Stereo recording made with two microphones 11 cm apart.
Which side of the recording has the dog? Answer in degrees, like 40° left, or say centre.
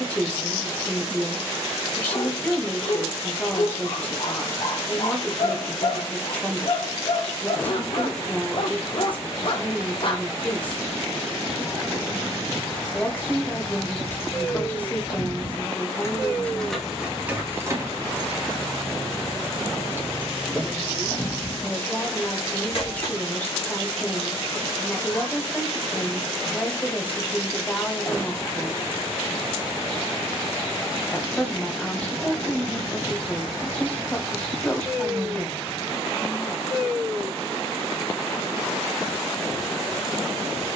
50° left.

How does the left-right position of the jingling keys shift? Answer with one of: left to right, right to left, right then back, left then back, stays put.
right then back.